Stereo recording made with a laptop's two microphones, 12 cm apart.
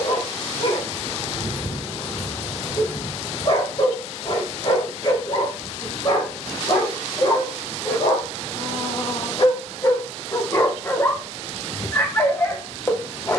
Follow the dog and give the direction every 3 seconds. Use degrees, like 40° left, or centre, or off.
50° left, 50° left, 50° left, 30° left, 20° left.